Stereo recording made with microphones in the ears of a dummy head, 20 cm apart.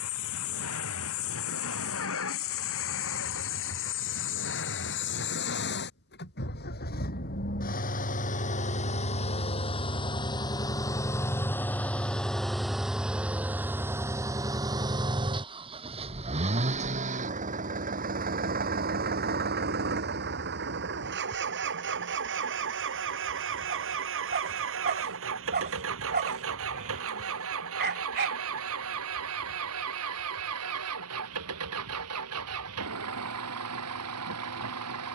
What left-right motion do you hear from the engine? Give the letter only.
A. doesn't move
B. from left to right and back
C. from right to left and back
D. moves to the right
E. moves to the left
D.